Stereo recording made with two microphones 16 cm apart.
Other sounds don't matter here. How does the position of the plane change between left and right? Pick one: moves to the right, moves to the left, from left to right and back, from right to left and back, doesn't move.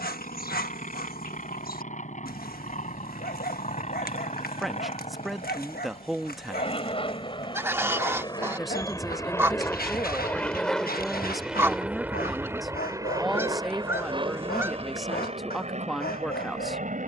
moves to the right.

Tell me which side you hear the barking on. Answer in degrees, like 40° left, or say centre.
70° left.